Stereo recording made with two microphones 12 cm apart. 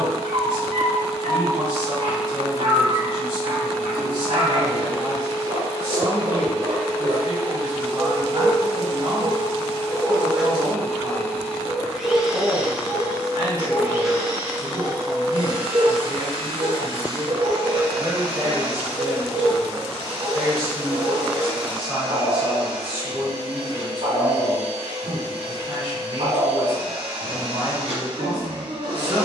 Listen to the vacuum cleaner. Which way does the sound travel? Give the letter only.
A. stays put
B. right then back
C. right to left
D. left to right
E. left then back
D.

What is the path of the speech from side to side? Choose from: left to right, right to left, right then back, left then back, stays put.
left then back.